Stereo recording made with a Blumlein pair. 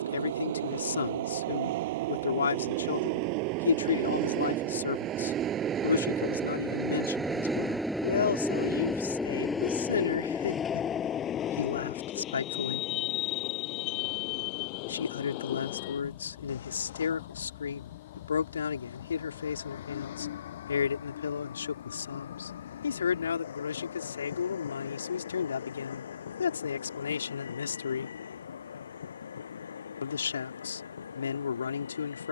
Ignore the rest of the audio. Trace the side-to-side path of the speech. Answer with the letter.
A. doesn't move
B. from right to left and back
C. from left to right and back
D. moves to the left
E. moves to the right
A.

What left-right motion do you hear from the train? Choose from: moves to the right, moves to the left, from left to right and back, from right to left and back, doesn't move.
moves to the left.